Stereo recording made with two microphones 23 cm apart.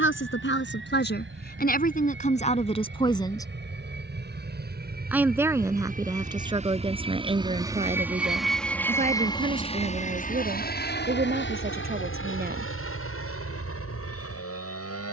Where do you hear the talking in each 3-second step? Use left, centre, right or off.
left, centre, right, right, right.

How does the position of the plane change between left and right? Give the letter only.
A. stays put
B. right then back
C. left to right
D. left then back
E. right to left
E.